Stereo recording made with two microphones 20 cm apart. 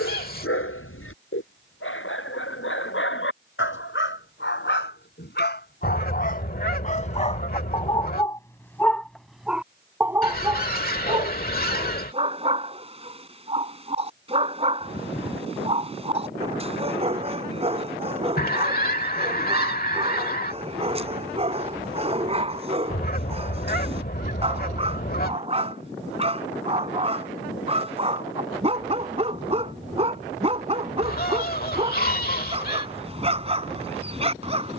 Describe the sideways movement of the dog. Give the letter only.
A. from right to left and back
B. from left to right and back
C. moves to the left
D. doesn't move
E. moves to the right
E.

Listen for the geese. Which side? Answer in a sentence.
You can hear the geese on the left.